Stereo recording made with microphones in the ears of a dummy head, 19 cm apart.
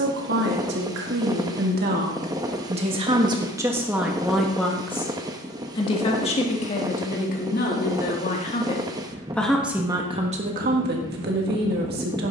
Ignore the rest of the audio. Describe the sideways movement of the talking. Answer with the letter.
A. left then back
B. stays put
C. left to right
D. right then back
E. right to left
A.